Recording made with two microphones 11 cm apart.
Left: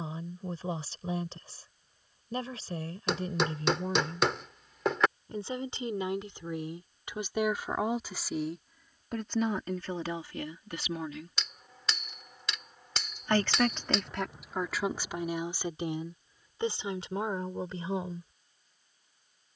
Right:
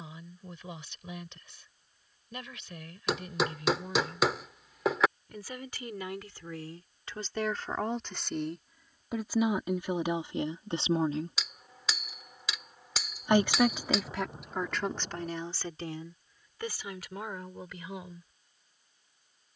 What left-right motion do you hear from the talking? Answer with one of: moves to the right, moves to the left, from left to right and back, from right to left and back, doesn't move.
from left to right and back.